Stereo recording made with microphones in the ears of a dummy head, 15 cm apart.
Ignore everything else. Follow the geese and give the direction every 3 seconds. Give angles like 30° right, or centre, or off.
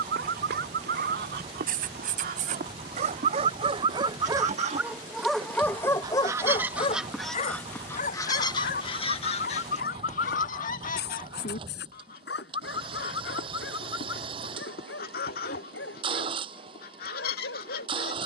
60° right, 50° right, 10° left, 50° left, 60° left, 60° left.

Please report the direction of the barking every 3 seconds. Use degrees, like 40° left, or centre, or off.
60° right, 20° right, 40° left, 70° left, 80° left, 80° left.